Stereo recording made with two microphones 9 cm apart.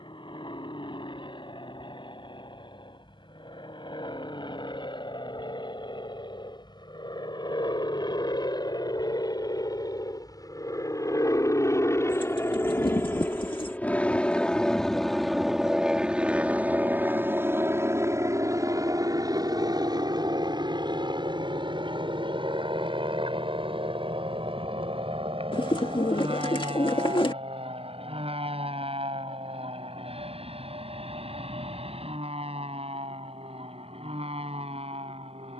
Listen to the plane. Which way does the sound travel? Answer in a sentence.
You can hear the plane move to the right.